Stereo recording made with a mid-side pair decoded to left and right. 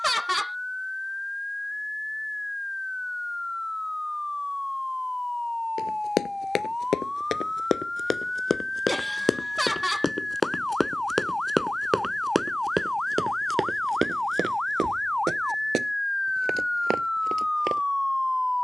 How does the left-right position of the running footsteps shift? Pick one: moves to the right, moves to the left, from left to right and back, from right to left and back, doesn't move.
moves to the right.